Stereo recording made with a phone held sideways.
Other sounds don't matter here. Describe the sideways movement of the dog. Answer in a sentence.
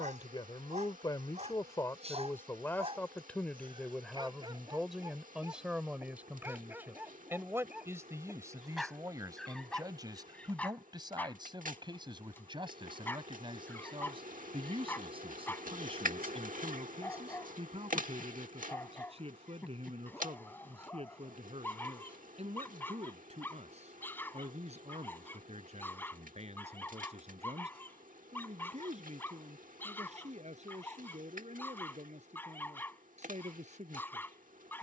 You can hear the dog move to the left.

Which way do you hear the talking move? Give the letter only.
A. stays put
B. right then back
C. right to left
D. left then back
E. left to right
E.